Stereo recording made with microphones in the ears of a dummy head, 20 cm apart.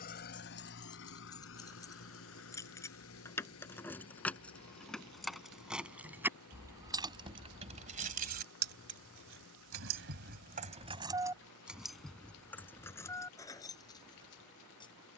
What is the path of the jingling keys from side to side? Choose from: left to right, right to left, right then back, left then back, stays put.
right then back.